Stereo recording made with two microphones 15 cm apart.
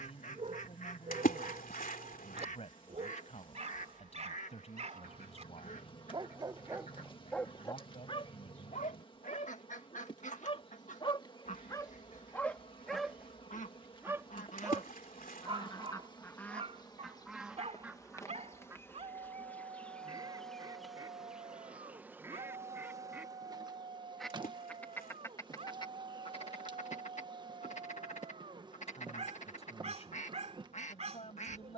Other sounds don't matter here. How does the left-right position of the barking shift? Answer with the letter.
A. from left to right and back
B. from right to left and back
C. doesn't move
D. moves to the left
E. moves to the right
B.